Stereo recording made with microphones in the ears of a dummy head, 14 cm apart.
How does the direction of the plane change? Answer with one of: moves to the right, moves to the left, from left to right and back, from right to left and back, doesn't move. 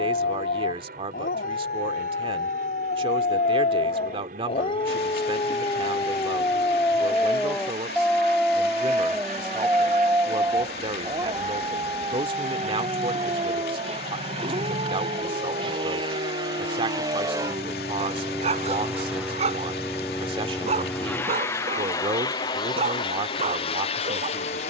moves to the left.